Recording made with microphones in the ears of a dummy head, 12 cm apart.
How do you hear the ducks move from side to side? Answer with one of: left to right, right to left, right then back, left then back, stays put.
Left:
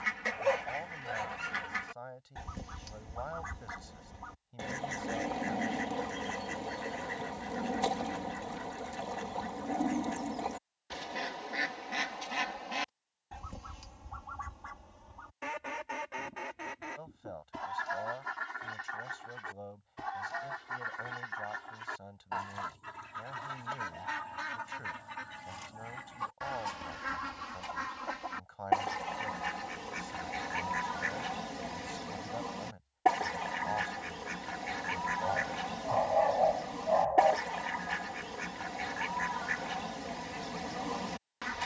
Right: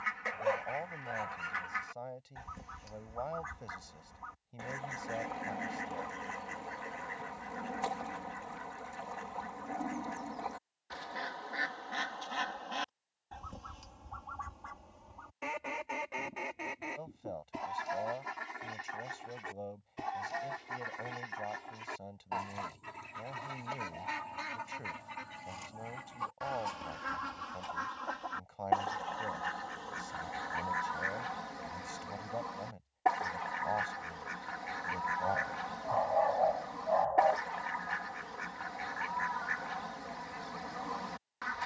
right then back.